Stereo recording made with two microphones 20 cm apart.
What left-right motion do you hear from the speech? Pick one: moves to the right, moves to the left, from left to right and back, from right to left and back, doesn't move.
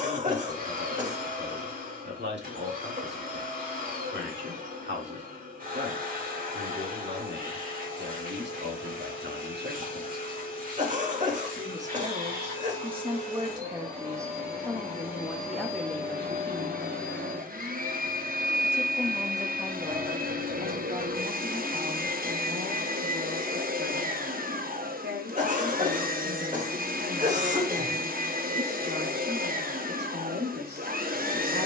from right to left and back.